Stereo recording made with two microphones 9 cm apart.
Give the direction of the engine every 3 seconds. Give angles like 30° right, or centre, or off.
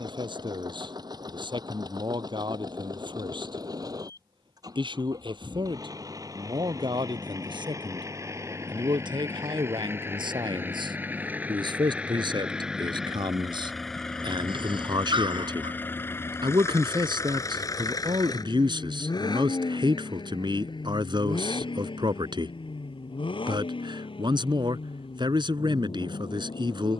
50° right, 50° right, 40° right, 20° right, centre, 30° left, 50° left, 70° left, 80° left.